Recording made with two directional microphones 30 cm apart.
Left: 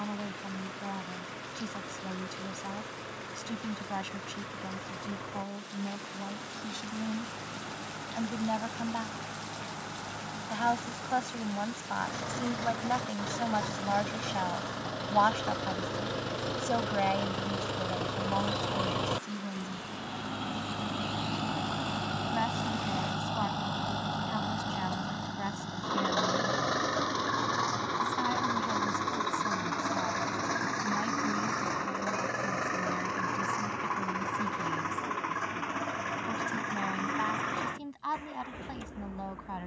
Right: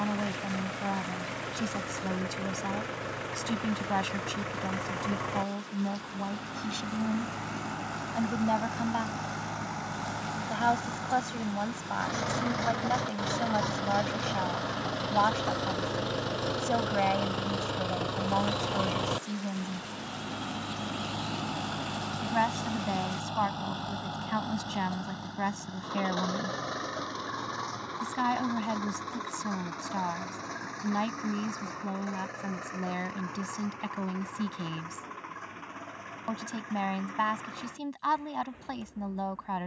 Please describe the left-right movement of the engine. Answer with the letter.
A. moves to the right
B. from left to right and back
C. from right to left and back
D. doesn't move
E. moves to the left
E.